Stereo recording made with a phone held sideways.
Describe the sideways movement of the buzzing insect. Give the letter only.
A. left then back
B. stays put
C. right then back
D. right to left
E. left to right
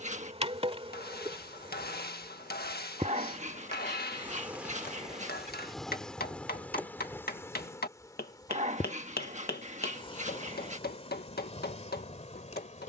D.